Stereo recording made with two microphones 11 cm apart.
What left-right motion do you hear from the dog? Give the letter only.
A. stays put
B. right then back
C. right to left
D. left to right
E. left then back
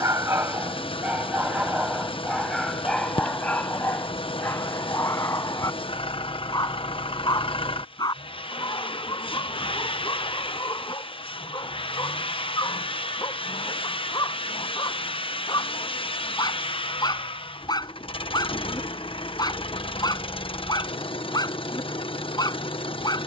C.